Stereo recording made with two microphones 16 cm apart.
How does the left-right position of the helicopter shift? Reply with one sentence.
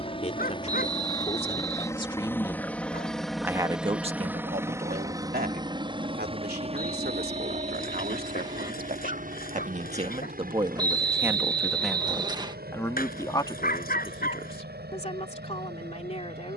You can hear the helicopter go from the left side to the right.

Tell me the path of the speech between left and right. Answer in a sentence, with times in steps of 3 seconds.
You can hear the speech on the left from 0 s, on the right from 3 s and on the left from 12 s.